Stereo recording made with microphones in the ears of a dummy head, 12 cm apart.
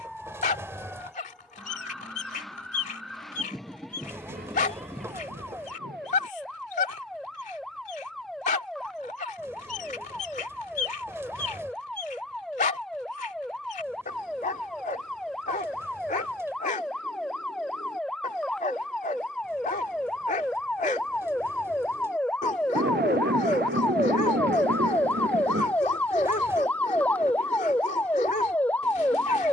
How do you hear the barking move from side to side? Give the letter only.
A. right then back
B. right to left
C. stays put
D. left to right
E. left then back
C.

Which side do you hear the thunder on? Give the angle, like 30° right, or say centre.
90° right.